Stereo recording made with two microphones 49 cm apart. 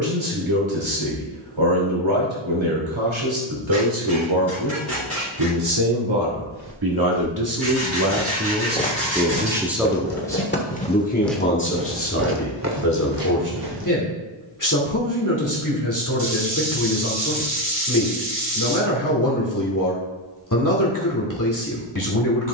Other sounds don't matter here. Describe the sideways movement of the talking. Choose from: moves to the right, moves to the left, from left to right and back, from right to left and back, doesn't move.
moves to the left.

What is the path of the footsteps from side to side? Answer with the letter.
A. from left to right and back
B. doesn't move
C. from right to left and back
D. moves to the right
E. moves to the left
C.